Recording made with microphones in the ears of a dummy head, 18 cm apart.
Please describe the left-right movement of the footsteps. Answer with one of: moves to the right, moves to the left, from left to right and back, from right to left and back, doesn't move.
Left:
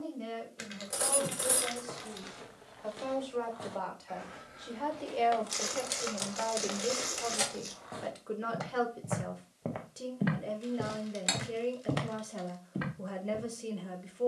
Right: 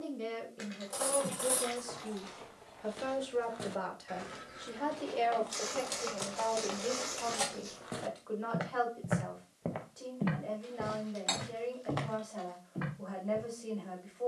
from left to right and back.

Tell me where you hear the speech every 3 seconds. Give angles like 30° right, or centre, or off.
40° right, 10° right, 20° left, 40° left, 40° left.